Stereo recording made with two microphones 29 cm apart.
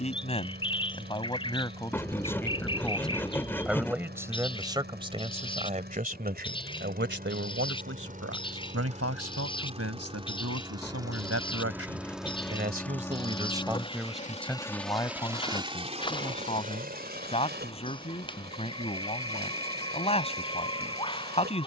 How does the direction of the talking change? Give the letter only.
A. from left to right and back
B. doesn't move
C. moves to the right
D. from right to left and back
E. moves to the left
A.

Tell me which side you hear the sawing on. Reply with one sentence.
You can hear the sawing in the centre.